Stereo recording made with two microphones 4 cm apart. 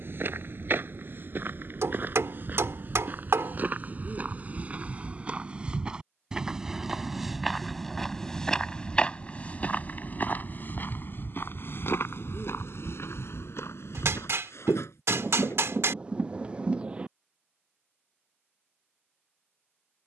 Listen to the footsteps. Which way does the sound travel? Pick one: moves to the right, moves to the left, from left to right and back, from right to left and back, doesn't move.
moves to the left.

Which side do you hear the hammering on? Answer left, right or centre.
right.